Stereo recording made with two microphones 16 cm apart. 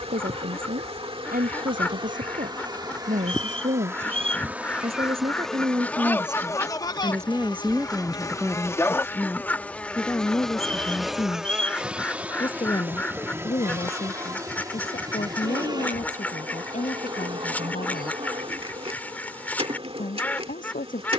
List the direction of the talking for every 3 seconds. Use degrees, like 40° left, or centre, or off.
60° right, 40° right, 10° right, 20° left, 40° left, 50° left, 60° left.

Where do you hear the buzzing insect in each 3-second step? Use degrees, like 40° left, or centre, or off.
30° right, 10° right, 20° left, centre, 20° right, 30° right, 40° right.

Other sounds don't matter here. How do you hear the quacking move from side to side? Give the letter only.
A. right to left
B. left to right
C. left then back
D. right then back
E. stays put
E.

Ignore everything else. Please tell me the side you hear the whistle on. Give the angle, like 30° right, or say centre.
40° right.